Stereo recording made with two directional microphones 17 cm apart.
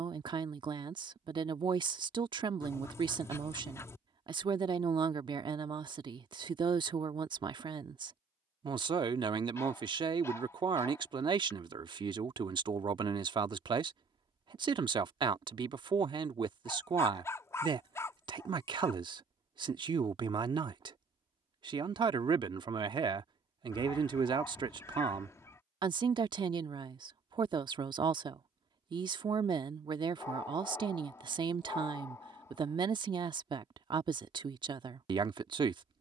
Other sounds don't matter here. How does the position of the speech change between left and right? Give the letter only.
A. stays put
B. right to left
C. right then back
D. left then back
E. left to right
A.